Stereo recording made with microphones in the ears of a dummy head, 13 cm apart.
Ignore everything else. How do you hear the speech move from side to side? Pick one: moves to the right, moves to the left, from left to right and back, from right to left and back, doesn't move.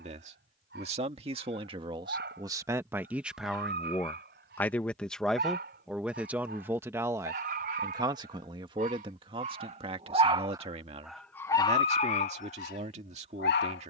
from right to left and back.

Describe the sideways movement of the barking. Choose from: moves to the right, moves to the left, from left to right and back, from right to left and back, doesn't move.
moves to the left.